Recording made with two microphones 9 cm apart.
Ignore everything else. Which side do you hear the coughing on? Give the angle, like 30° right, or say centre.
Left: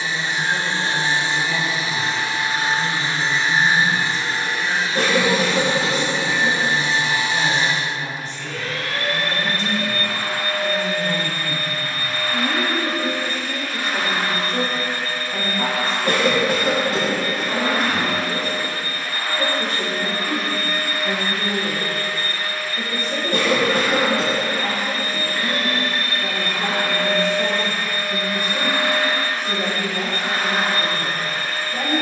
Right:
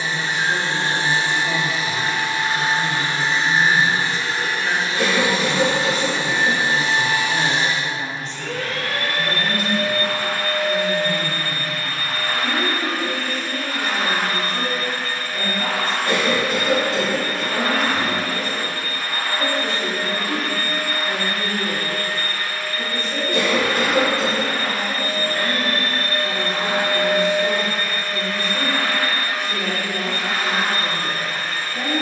60° left.